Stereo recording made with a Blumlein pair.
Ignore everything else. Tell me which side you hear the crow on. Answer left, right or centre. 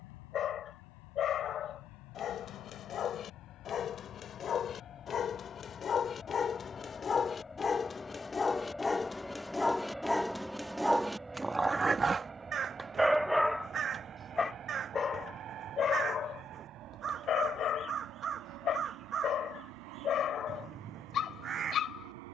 right.